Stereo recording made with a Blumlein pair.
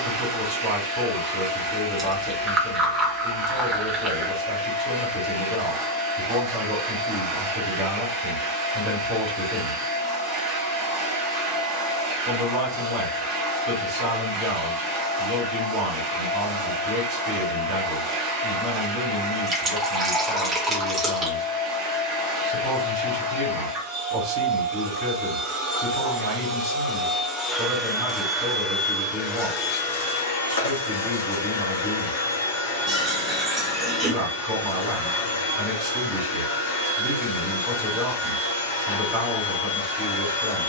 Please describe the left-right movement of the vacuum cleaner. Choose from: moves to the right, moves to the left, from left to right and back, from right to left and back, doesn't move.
moves to the left.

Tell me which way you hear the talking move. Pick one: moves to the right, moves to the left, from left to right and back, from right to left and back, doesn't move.
doesn't move.